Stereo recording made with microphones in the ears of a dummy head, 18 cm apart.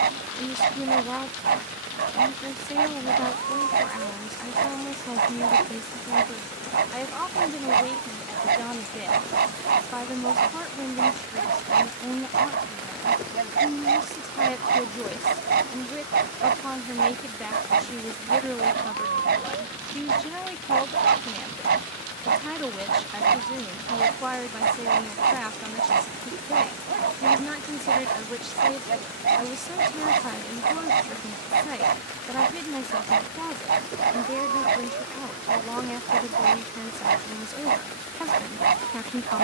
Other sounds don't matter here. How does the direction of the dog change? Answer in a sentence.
You can hear the dog stay in one place.